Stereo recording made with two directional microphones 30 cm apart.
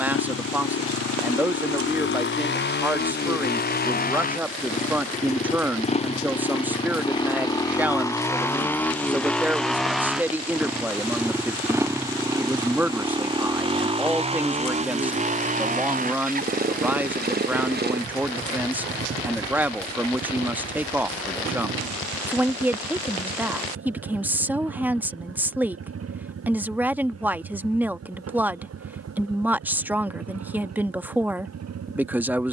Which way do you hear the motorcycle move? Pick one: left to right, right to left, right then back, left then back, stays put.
left to right.